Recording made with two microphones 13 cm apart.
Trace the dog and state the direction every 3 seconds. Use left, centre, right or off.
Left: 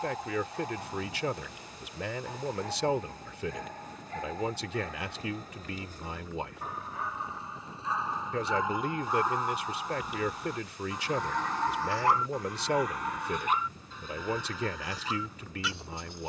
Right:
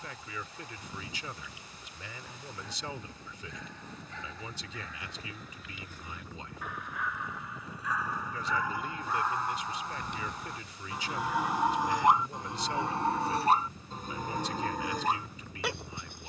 left, left, left, centre, right, right.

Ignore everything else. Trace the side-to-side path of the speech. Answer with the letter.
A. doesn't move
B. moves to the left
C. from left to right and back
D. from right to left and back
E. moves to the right
A.